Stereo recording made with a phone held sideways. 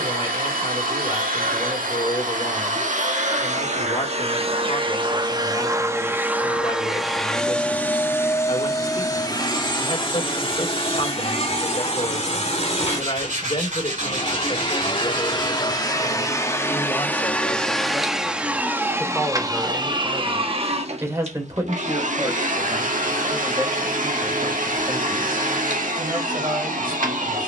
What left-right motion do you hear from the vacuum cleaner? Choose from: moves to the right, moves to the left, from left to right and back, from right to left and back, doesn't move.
from right to left and back.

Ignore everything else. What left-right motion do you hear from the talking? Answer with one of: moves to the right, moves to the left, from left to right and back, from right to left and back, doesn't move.
moves to the right.